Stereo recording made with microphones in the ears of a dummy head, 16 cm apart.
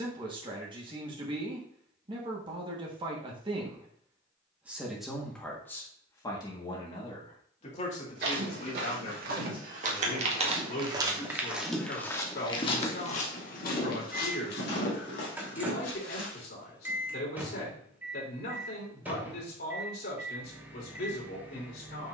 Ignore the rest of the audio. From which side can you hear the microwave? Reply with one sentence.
In this clip you hear the microwave in the centre.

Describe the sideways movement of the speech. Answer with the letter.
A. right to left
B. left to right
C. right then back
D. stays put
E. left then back
A.